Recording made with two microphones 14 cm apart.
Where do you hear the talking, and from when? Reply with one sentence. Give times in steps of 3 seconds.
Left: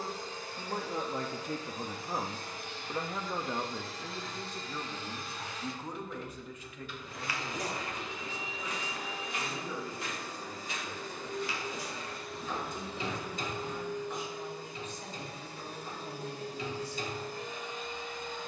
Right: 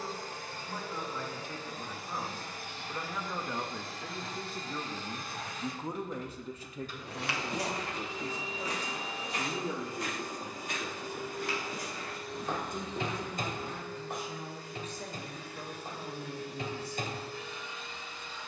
You can hear the talking on the left from 0 s, in the centre from 3 s and on the right from 6 s.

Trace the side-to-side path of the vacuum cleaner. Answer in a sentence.
In this clip you hear the vacuum cleaner move to the left.